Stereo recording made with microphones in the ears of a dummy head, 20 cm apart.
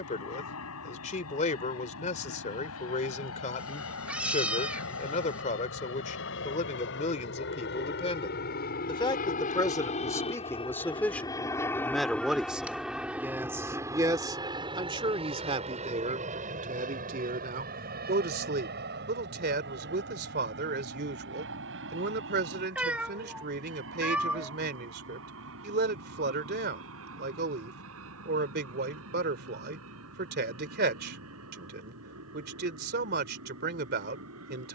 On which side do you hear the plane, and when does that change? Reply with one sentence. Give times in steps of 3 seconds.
In this clip you hear the plane on the left from 0 s, in the centre from 12 s and on the right from 15 s.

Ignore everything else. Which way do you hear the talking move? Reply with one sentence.
In this clip you hear the talking go from the left side to the right.